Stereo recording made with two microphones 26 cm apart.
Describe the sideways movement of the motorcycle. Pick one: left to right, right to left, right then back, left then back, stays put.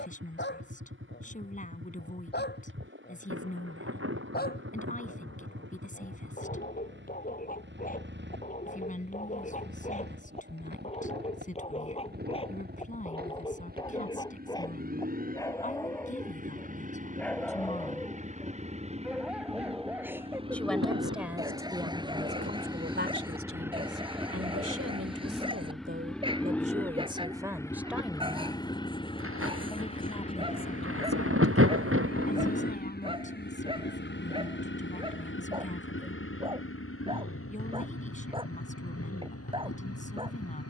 right to left.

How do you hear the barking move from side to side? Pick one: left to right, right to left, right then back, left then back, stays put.
left to right.